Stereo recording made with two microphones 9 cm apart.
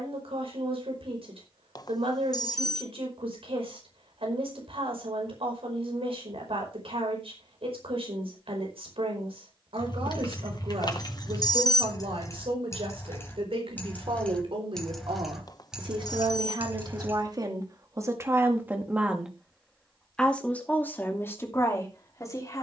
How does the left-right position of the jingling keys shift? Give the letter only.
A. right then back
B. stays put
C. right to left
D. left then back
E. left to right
E.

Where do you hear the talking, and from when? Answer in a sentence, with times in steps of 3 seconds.
In this clip you hear the talking on the right from 0 s, in the centre from 18 s and on the left from 21 s.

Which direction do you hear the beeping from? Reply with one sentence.
You can hear the beeping on the left.